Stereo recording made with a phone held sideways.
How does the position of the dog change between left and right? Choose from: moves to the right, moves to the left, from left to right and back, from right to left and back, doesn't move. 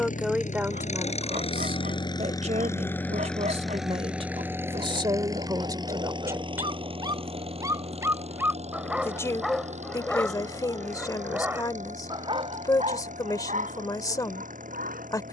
from right to left and back.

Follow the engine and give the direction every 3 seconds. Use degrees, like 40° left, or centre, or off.
40° left, 10° right, 40° right, 50° right, 60° right.